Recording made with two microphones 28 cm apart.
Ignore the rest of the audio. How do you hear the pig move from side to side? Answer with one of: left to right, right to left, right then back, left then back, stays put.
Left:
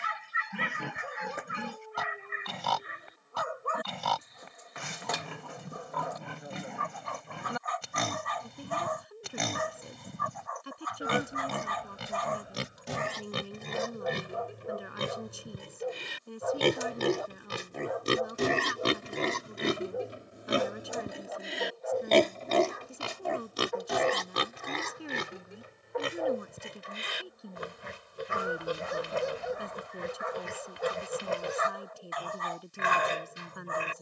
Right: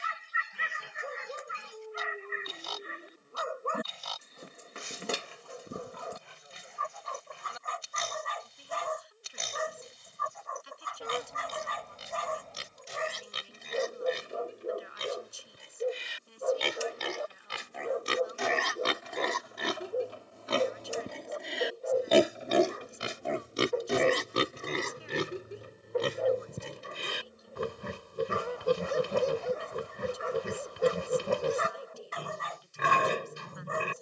left to right.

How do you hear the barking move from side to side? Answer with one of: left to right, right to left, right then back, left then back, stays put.
stays put.